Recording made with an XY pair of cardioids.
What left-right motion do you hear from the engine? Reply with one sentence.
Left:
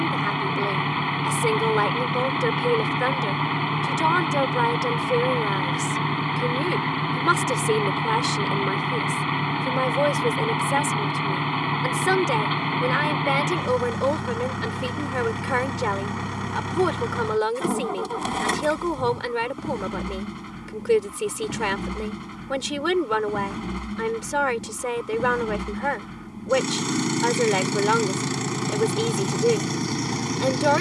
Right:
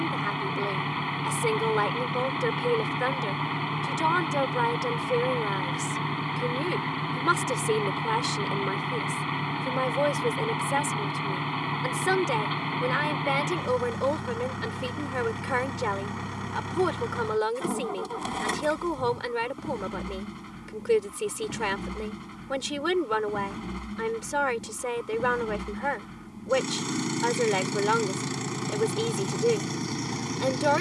You can hear the engine stay put.